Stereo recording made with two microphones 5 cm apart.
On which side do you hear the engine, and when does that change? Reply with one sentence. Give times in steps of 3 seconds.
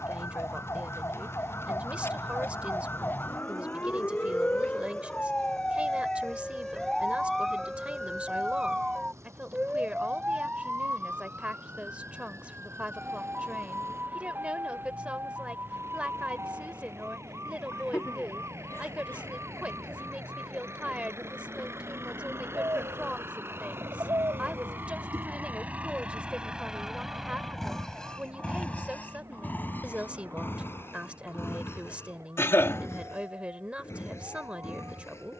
In this clip you hear the engine on the right from 0 s and on the left from 27 s.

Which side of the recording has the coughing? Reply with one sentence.
You can hear the coughing on the left.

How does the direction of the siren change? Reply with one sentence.
You can hear the siren travel towards the right.